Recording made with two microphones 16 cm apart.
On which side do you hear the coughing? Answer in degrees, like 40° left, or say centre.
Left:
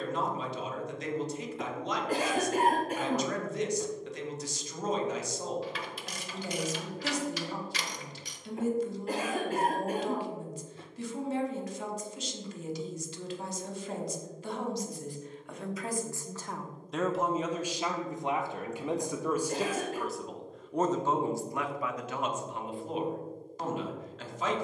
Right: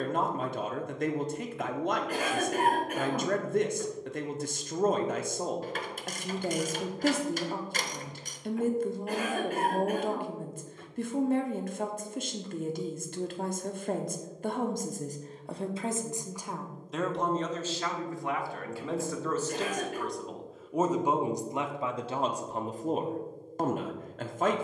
30° left.